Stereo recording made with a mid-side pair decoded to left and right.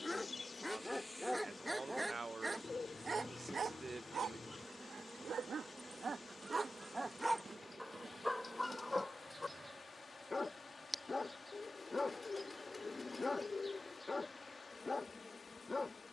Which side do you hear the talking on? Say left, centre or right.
right.